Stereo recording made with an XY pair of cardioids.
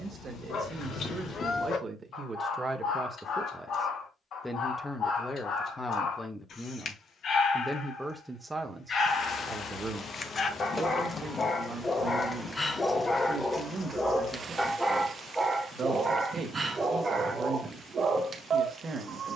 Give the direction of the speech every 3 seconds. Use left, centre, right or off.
right, centre, centre, right, right, right, right.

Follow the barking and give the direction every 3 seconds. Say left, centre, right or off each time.
left, left, left, left, centre, right, right.